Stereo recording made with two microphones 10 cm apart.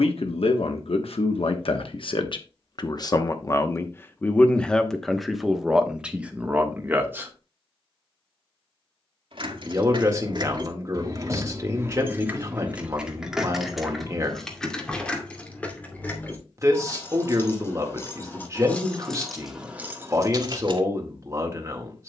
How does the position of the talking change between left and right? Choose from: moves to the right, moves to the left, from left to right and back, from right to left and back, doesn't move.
moves to the right.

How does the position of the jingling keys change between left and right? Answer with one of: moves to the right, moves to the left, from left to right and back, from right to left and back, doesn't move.
from right to left and back.